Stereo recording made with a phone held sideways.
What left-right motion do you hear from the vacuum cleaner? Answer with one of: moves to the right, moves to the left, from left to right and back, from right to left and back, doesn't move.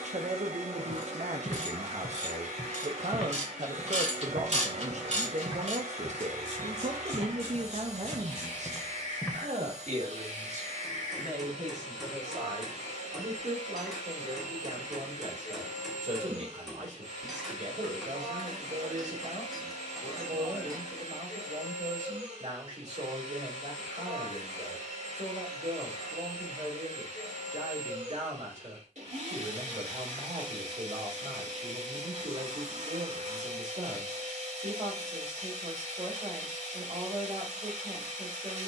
doesn't move.